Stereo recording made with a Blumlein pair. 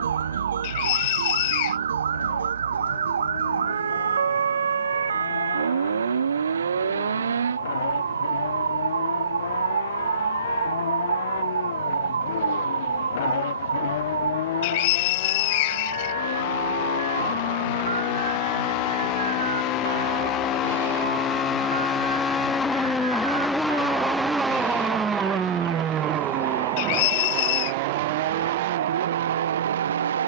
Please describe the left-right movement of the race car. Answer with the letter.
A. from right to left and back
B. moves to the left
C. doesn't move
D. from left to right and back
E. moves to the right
E.